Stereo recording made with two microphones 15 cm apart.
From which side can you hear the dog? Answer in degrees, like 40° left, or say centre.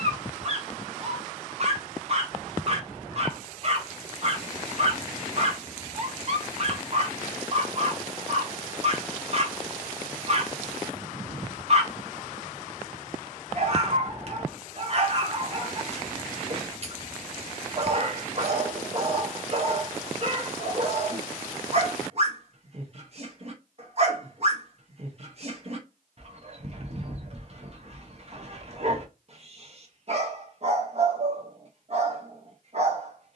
40° right.